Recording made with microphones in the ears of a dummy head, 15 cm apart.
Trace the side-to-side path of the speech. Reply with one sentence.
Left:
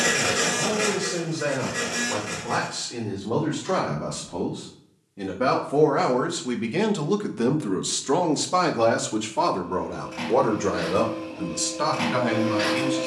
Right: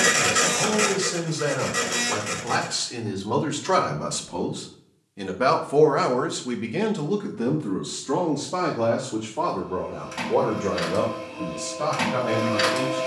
You can hear the speech go from the right side to the left.